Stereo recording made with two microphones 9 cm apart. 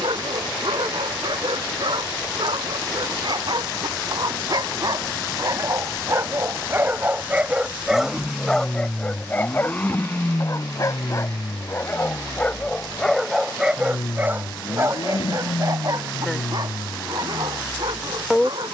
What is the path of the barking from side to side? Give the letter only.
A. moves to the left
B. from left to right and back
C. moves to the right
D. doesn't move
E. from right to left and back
E.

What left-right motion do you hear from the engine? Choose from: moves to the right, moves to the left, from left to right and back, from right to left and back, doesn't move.
moves to the left.